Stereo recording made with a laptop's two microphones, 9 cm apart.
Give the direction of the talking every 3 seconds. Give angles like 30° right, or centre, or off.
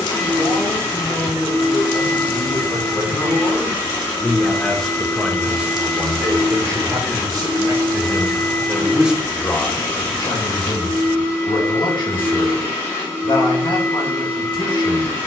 60° left, 10° left, 40° right, 50° left, 60° left.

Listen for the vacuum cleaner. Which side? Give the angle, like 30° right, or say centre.
20° left.